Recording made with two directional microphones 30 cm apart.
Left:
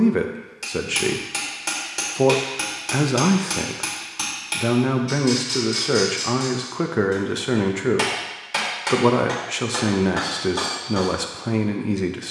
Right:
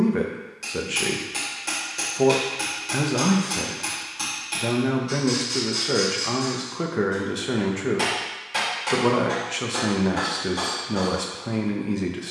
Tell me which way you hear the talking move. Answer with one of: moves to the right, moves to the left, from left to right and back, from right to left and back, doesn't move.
doesn't move.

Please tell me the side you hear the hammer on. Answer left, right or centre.
left.